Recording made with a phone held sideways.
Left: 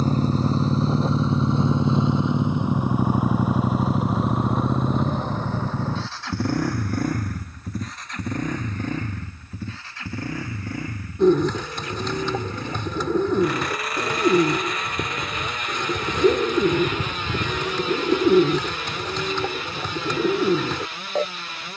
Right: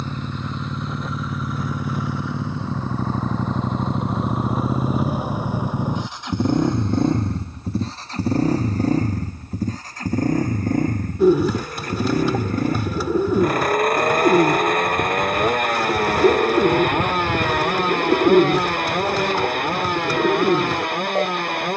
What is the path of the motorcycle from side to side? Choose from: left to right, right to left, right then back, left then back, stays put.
left to right.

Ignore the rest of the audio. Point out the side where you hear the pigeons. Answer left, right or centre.
centre.